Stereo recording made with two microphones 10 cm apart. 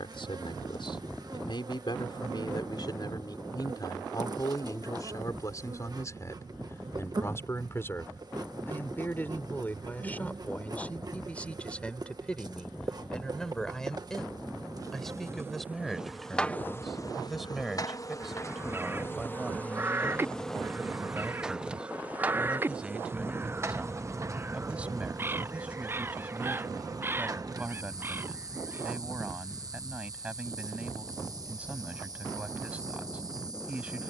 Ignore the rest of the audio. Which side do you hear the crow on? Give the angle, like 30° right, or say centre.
20° right.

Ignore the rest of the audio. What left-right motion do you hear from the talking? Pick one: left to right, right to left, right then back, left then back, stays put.
left to right.